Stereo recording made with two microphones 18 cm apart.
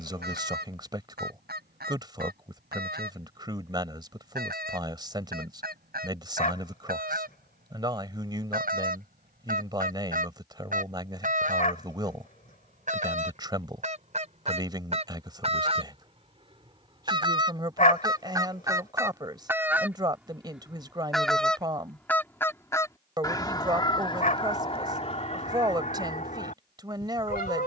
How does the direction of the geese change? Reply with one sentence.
In this clip you hear the geese move to the left.